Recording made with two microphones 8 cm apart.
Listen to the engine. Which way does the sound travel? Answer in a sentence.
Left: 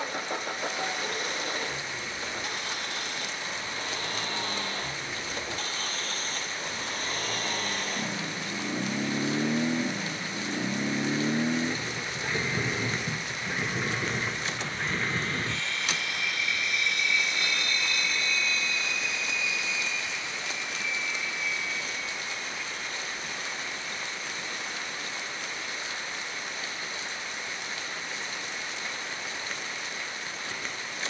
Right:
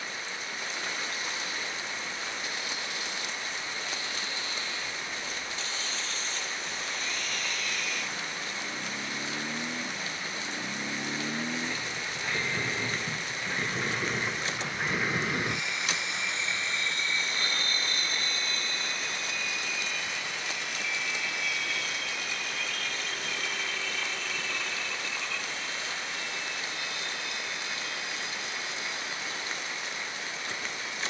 You can hear the engine move to the right.